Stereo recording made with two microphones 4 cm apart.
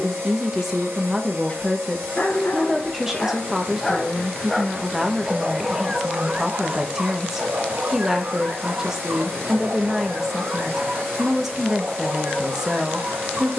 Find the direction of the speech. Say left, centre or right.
centre.